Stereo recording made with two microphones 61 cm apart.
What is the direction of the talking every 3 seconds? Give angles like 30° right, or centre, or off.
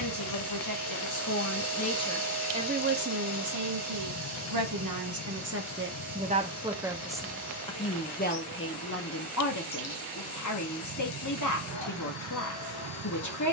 20° left, 30° right, 10° left, 30° left, 30° left.